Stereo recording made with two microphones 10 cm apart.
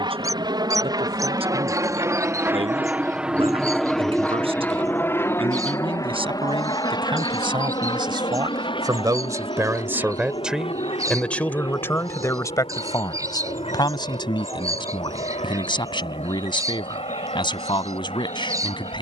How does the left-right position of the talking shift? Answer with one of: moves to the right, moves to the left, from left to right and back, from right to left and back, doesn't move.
moves to the left.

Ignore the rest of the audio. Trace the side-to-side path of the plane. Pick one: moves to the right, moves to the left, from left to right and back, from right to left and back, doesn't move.
moves to the left.